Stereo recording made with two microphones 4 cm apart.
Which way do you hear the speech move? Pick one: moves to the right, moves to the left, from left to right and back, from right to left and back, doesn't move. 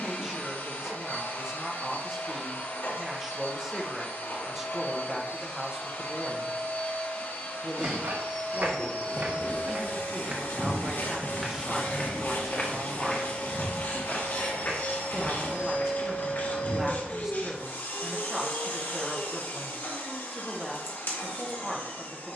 doesn't move.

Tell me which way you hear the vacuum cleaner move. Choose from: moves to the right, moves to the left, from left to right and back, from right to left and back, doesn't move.
doesn't move.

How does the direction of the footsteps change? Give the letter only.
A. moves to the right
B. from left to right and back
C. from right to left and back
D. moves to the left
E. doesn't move
D.